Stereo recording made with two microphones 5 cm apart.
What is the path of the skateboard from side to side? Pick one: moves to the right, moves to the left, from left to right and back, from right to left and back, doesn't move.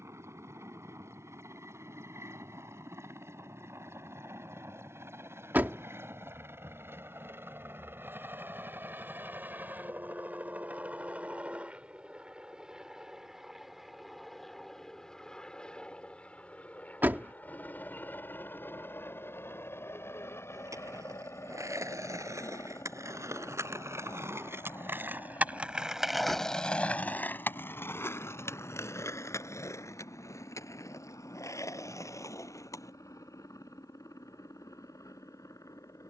moves to the left.